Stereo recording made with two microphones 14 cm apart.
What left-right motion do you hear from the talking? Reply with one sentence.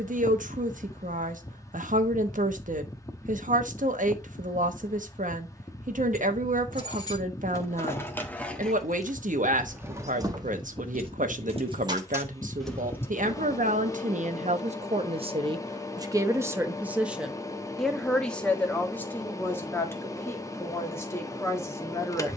You can hear the talking go from the right side to the left.